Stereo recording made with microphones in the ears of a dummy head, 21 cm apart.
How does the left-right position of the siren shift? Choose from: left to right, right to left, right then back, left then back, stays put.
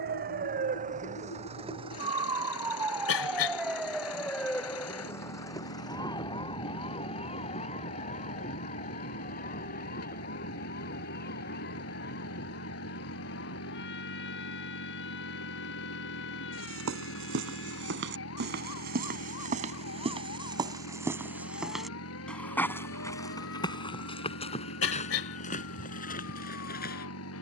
right to left.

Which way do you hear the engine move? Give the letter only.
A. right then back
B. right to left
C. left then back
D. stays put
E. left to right
D.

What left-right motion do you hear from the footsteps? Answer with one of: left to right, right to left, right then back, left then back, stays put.
right to left.